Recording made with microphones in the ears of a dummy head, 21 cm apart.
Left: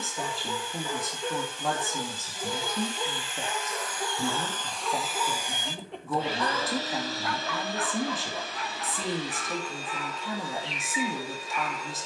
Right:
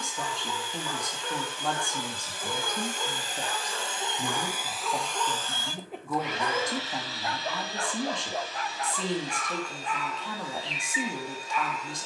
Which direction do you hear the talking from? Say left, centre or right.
centre.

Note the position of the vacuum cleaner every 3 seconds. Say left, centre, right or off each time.
right, centre, left, left.